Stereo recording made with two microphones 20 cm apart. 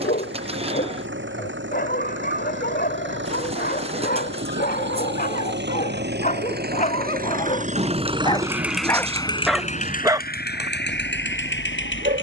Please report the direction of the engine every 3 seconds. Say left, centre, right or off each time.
right, right, right, left.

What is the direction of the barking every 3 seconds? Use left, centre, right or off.
left, left, left, right.